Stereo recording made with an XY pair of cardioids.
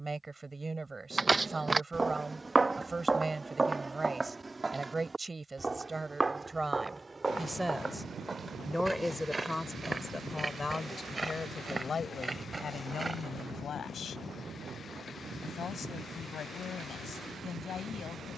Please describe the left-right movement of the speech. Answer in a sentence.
You can hear the speech move from right to left.